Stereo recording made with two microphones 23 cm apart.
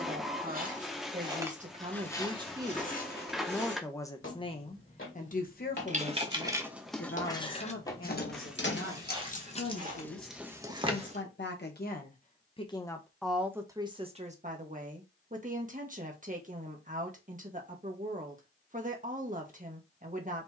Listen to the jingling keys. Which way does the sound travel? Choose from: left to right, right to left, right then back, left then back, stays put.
left then back.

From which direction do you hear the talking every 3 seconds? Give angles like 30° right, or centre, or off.
30° right, 30° left, 60° left, 60° left, 10° right, 40° right, 40° right.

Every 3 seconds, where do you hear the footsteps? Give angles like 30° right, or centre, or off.
centre, 50° left, 20° left, 30° right, off, off, off.